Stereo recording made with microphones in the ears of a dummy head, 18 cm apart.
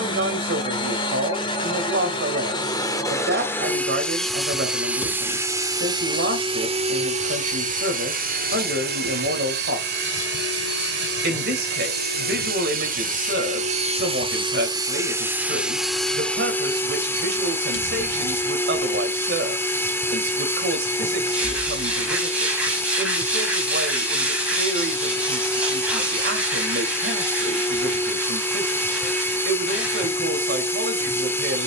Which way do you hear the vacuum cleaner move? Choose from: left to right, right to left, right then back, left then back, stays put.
right then back.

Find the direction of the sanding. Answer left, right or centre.
centre.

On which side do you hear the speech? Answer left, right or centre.
right.